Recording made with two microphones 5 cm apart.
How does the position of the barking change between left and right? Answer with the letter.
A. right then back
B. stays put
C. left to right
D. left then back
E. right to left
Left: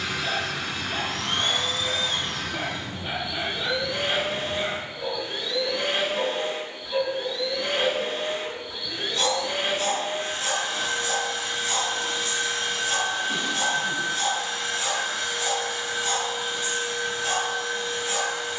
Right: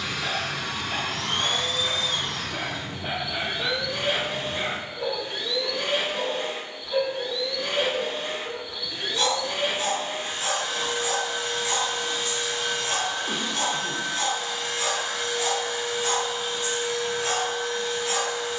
D.